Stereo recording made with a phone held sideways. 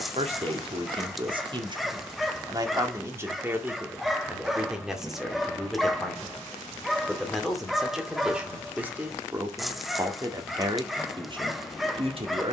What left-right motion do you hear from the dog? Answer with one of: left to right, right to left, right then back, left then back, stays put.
stays put.